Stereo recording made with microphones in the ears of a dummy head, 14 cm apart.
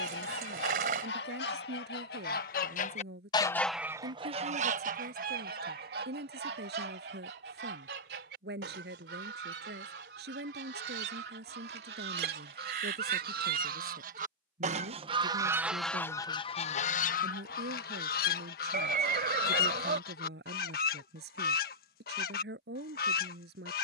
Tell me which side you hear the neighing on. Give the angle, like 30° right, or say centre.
60° right.